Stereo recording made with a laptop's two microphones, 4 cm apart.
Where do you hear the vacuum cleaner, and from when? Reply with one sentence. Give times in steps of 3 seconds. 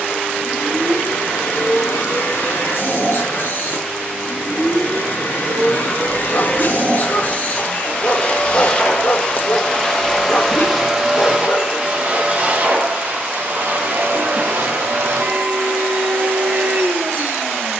In this clip you hear the vacuum cleaner on the left from 0 s, in the centre from 9 s and on the right from 12 s.